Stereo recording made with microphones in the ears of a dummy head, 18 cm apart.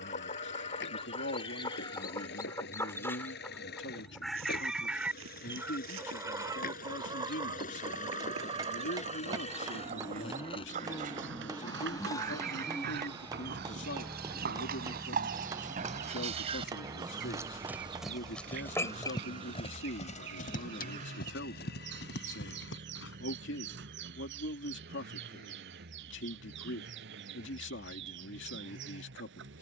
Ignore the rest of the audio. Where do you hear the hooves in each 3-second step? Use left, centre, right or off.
off, right, right, right, right, right, left, left, off, off.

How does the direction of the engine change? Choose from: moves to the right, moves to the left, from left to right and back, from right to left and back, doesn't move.
moves to the right.